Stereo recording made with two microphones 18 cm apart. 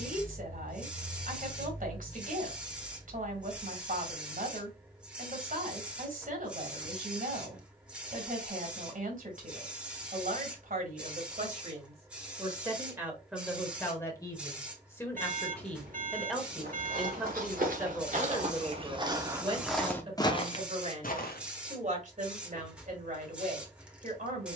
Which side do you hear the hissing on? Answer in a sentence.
In this clip you hear the hissing in the centre.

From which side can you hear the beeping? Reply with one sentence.
You can hear the beeping on the right.